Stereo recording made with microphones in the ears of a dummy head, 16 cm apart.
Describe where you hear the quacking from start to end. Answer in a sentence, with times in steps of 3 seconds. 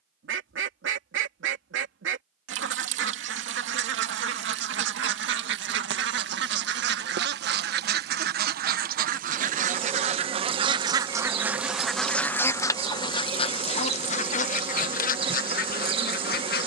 In this clip you hear the quacking on the right from 0 s and on the left from 12 s.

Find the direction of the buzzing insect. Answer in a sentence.
You can hear the buzzing insect on the right.